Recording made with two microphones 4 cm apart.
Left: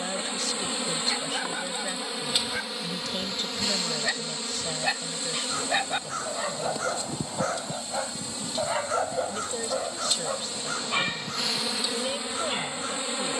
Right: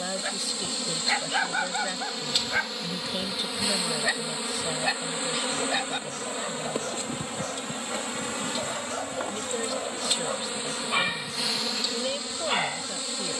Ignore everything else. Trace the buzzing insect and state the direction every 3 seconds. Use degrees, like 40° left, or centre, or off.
20° left, 20° right, 50° right, 30° right, 20° left.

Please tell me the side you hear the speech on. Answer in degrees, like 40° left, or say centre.
10° right.